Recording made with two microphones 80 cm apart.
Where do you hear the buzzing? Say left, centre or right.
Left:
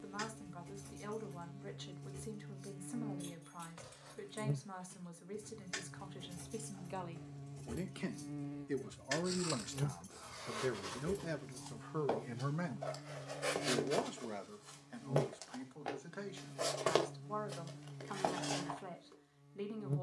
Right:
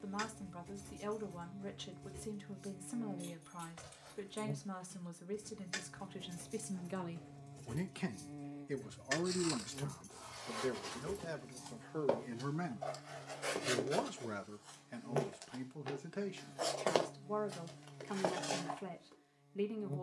left.